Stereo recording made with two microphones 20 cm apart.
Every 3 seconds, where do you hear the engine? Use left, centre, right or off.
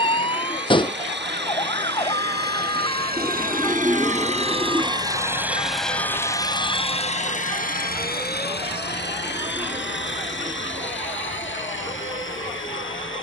right, right, left, left, left.